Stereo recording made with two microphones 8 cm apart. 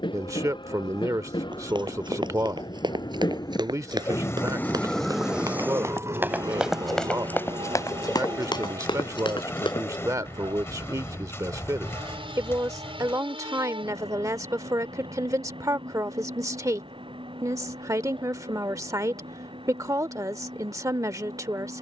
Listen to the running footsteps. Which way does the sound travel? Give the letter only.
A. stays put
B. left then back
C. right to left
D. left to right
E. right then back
C.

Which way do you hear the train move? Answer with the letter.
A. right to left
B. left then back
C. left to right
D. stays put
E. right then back
C.